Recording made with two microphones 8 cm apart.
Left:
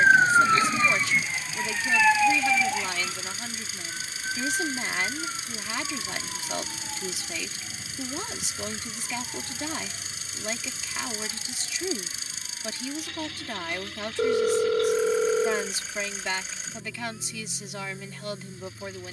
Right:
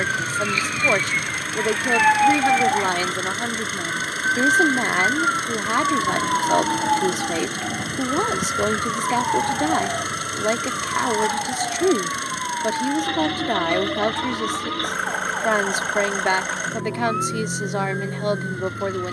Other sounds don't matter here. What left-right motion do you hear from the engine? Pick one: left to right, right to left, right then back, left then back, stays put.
stays put.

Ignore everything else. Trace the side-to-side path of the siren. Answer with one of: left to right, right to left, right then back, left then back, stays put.
left to right.